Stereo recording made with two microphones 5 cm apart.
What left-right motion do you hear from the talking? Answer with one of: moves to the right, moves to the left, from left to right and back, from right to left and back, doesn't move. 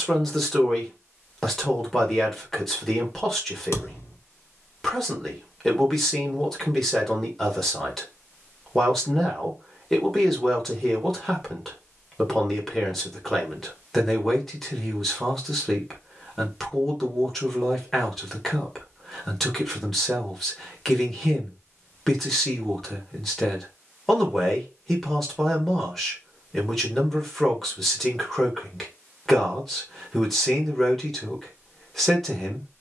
doesn't move.